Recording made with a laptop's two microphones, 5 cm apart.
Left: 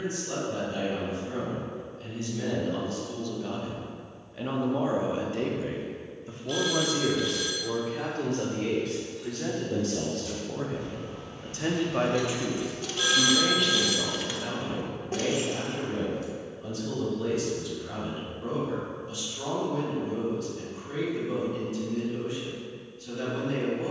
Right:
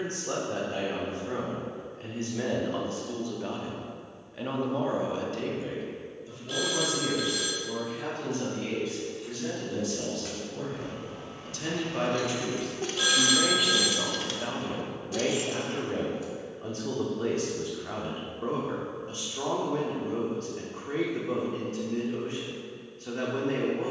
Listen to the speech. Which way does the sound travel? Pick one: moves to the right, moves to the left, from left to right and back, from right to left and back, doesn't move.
from right to left and back.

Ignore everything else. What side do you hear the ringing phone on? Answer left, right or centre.
centre.